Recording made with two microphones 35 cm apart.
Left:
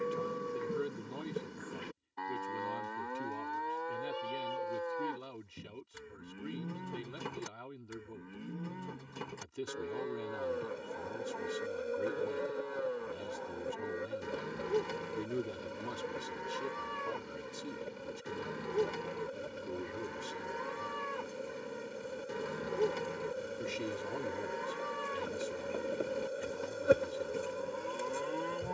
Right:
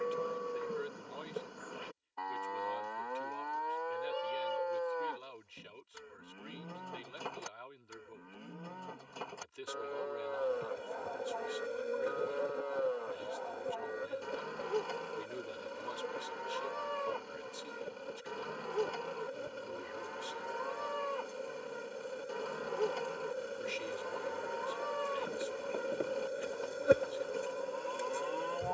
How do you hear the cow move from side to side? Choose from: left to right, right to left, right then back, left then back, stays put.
stays put.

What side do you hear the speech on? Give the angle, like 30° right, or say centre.
60° left.